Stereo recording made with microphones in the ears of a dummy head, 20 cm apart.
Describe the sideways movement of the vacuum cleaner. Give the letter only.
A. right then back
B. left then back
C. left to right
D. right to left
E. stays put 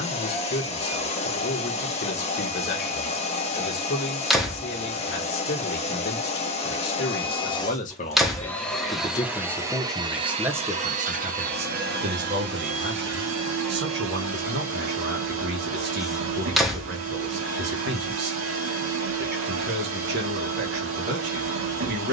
C.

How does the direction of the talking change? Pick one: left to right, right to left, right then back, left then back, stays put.
left to right.